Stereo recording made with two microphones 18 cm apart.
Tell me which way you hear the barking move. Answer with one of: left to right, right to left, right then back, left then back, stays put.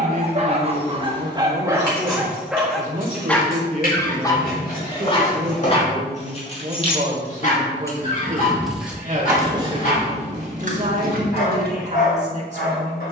right to left.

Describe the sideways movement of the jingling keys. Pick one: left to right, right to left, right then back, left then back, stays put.
left to right.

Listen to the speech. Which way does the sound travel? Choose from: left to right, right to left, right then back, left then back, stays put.
stays put.